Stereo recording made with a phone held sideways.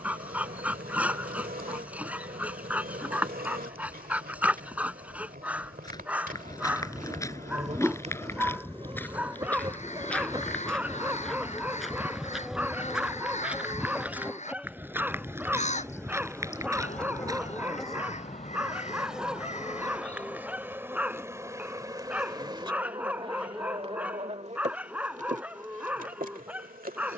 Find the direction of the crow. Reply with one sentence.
You can hear the crow on the left.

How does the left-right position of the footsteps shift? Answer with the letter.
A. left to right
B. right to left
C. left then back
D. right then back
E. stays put
A.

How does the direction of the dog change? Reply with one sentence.
You can hear the dog stay put.